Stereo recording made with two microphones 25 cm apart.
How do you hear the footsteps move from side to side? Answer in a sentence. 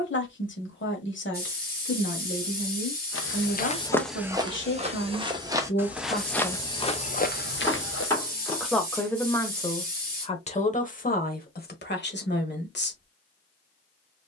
You can hear the footsteps move from left to right and back again.